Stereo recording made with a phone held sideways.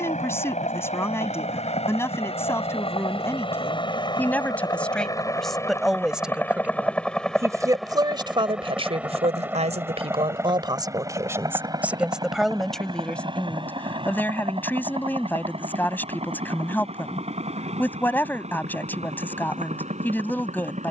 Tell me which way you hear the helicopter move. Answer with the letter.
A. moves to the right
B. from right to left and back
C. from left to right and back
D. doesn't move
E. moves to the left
A.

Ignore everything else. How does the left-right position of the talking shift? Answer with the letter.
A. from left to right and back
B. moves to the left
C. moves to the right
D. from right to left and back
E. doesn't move
A.